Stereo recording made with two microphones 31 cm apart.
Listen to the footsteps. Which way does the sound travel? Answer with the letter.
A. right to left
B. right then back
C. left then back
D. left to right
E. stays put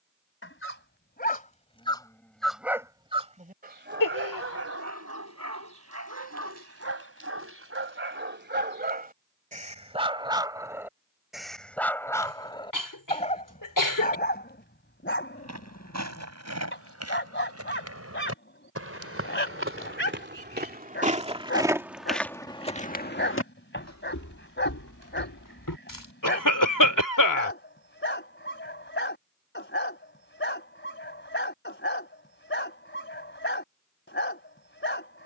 A.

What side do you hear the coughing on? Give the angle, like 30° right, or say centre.
70° left.